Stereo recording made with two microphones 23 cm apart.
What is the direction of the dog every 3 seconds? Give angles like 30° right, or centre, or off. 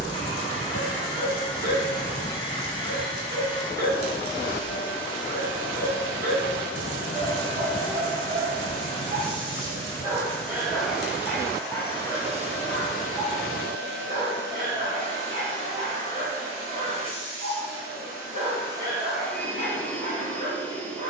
40° right, 40° right, 40° right, 10° right, 20° right, 40° right, 40° right.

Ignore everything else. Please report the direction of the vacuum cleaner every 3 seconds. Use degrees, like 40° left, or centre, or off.
20° left, 20° left, 20° left, centre, 40° right, 60° right, centre.